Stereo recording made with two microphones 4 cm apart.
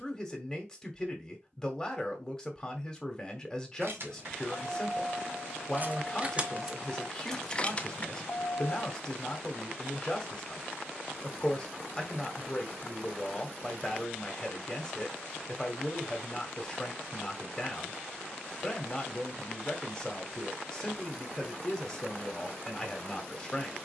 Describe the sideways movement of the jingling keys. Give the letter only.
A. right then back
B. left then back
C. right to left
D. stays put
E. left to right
C.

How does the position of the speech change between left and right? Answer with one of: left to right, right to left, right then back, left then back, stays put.
stays put.